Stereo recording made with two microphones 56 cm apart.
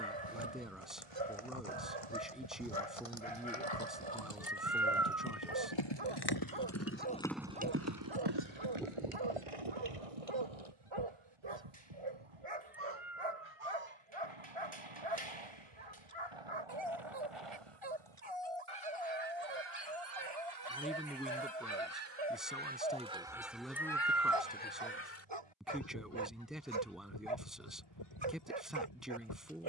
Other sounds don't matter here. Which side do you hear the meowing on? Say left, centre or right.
centre.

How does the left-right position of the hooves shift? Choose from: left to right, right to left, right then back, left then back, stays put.
left to right.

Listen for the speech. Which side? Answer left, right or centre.
centre.